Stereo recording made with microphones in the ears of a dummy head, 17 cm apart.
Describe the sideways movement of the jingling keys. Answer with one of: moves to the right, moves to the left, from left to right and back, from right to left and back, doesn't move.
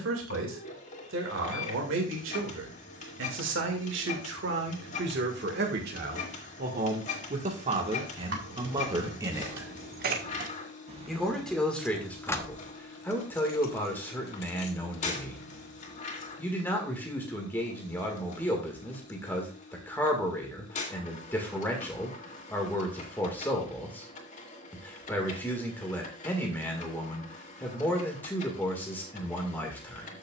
moves to the left.